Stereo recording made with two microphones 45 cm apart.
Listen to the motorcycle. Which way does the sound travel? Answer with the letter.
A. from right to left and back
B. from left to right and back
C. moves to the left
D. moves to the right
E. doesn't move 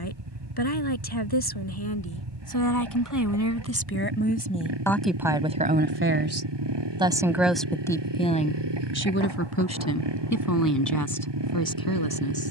E.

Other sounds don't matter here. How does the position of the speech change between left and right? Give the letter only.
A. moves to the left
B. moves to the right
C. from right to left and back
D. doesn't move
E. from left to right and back
E.